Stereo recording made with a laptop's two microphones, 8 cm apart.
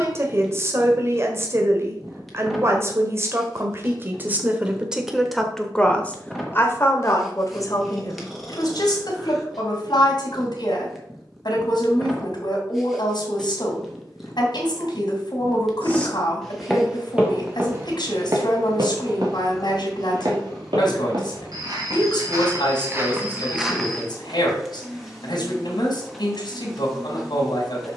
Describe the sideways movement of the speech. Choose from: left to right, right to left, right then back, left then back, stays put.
right to left.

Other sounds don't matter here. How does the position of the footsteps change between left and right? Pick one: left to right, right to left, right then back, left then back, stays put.
right then back.